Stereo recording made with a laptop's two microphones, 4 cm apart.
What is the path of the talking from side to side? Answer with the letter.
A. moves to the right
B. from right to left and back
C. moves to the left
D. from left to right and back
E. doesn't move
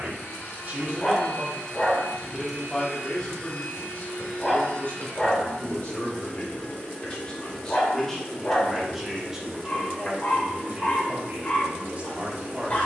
B.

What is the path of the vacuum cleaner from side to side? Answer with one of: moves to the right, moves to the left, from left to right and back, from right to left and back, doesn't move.
moves to the right.